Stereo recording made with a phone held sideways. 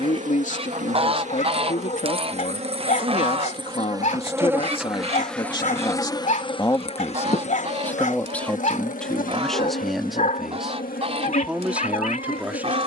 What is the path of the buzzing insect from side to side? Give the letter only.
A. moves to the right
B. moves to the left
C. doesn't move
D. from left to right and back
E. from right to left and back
B.